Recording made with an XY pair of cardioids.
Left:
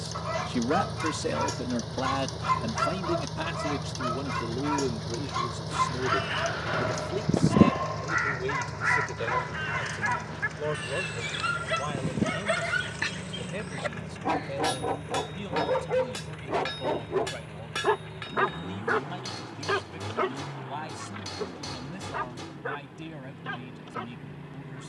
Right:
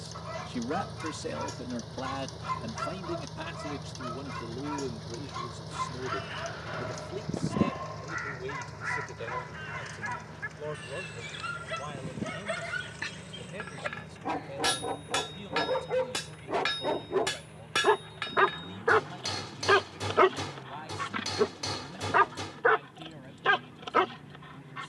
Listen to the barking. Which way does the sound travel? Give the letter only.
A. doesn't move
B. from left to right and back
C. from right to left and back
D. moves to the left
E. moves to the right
E.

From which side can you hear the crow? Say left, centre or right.
left.